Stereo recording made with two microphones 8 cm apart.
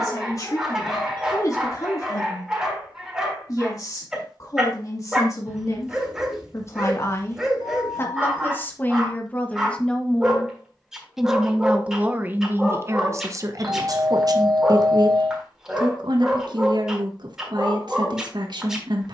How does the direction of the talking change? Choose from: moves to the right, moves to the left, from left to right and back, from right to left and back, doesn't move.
moves to the right.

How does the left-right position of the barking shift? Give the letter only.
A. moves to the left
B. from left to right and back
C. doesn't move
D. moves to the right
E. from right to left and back
C.